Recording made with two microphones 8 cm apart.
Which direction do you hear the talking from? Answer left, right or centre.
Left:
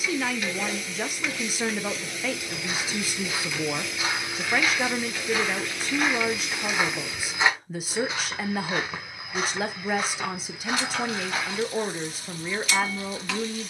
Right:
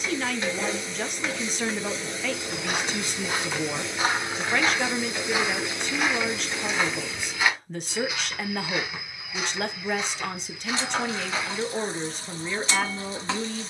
centre.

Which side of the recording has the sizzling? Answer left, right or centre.
right.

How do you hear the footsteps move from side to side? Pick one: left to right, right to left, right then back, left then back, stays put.
right to left.